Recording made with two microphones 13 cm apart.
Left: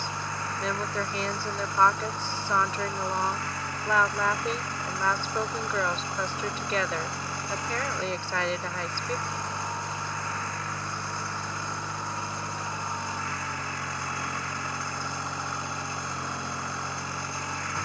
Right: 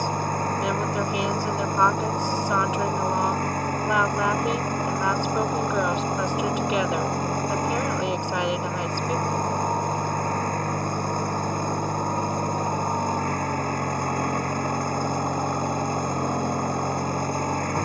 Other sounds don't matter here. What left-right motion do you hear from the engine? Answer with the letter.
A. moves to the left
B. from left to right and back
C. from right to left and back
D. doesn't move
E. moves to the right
D.